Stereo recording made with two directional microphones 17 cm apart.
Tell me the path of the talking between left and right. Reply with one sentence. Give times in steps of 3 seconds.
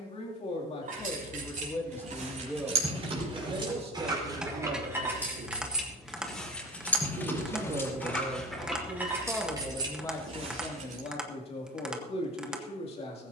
You can hear the talking on the left from 0 s, on the right from 3 s and on the left from 9 s.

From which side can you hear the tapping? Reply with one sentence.
In this clip you hear the tapping in the centre.